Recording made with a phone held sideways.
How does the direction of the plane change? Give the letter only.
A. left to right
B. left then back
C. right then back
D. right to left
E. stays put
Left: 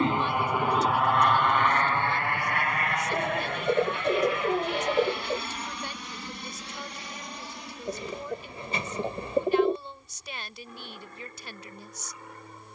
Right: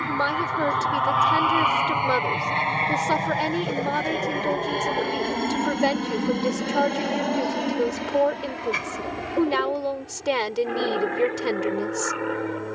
A.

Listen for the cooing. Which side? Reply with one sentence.
In this clip you hear the cooing on the left.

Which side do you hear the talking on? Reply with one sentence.
In this clip you hear the talking on the right.